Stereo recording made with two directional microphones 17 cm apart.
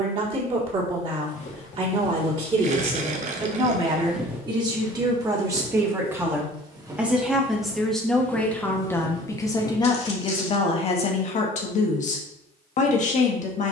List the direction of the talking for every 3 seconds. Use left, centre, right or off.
right, right, centre, left, left.